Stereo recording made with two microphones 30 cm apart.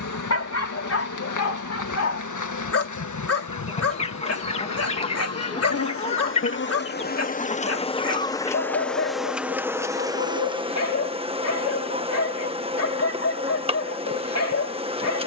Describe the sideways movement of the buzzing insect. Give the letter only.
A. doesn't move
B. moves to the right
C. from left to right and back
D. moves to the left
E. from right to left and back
B.